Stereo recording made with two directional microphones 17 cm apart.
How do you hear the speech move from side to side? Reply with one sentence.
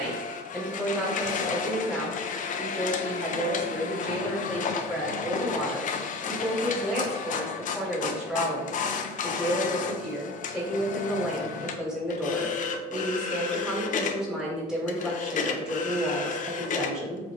In this clip you hear the speech stay in one place.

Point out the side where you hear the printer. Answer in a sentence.
In this clip you hear the printer on the left.